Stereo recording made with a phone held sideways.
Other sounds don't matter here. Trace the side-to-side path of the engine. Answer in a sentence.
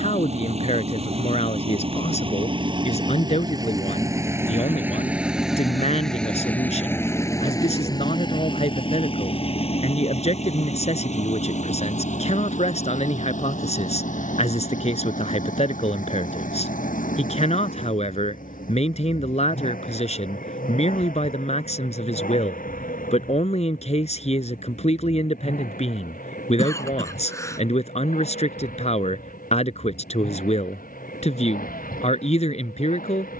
In this clip you hear the engine go from the right side to the left.